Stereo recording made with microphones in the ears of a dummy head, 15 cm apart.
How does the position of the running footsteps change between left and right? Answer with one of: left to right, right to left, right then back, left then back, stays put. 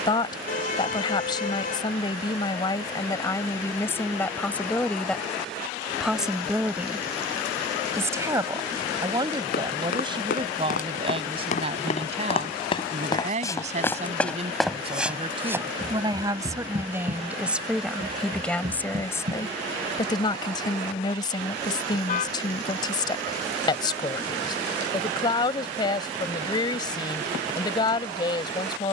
left to right.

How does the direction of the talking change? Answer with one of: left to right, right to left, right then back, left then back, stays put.
right then back.